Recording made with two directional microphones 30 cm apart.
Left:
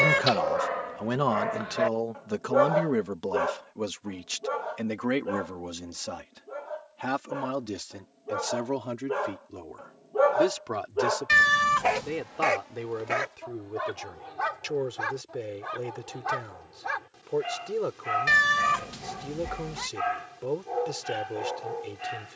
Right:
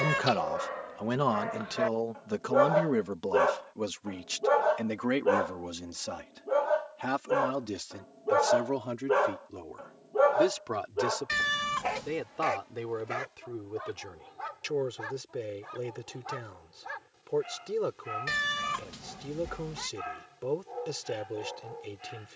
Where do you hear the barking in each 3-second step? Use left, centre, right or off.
left, right, right, centre, left, left, left, left.